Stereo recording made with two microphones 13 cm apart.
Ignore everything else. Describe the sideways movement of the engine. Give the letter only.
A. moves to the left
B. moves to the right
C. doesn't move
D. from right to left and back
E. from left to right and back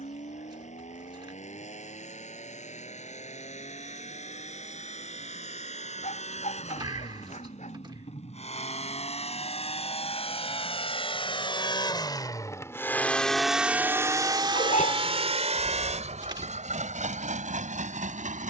B.